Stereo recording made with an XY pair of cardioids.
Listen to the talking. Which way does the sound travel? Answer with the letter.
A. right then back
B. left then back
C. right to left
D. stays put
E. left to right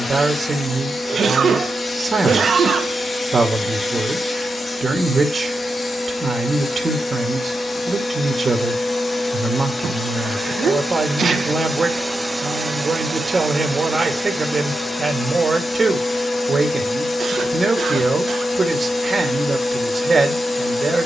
D.